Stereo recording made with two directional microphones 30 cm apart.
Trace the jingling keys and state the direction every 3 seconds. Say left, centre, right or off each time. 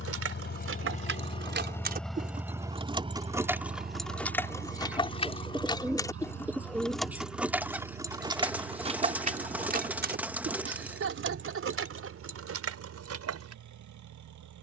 right, centre, centre, right, right.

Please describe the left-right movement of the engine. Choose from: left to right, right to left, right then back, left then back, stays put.
left to right.